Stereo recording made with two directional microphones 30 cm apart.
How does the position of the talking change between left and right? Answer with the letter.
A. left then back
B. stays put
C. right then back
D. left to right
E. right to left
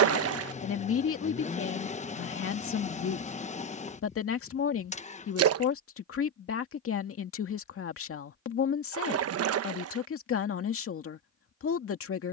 B.